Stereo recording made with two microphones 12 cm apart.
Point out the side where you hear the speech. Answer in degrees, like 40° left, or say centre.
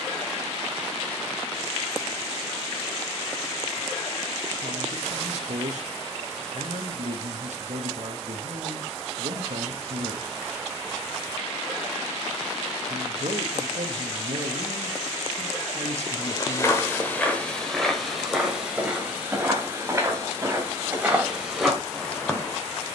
70° right.